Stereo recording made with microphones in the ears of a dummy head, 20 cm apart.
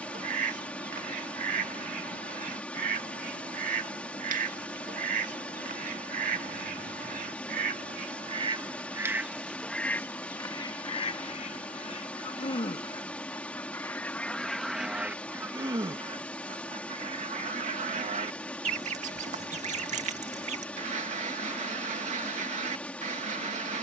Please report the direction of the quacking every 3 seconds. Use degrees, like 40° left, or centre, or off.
40° right, 40° right, 30° right, 20° left, 10° left, 30° right, 30° right, 30° right.